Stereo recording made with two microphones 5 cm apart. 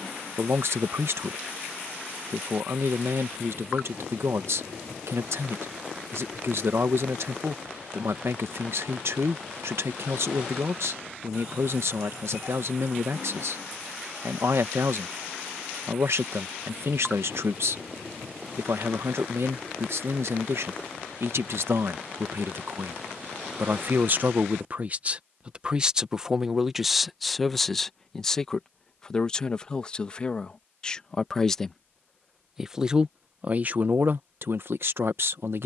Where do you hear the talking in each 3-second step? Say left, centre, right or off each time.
right, right, right, right, right, right, right, right, right, centre, centre, right.